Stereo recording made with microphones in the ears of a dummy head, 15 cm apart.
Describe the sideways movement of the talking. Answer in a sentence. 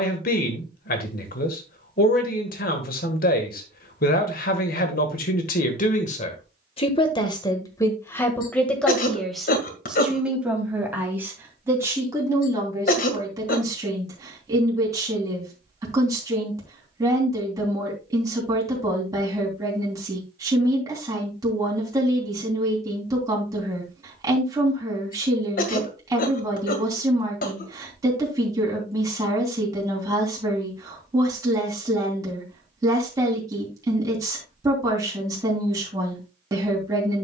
You can hear the talking move to the right.